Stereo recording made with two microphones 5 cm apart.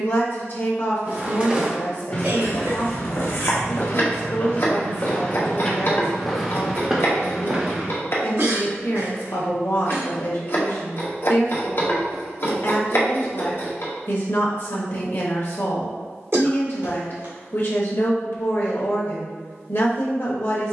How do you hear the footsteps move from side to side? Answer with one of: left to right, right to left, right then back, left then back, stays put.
left then back.